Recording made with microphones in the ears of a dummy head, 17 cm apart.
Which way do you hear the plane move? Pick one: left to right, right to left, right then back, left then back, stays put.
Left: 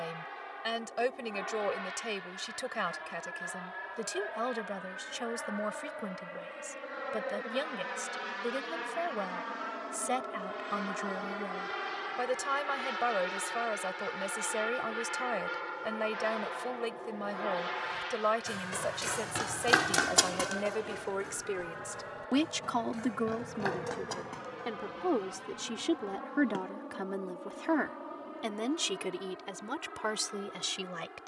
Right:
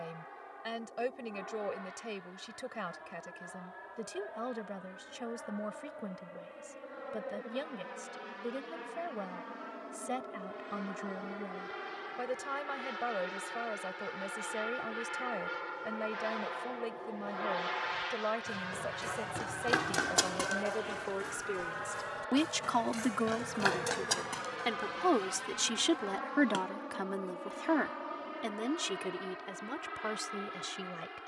left to right.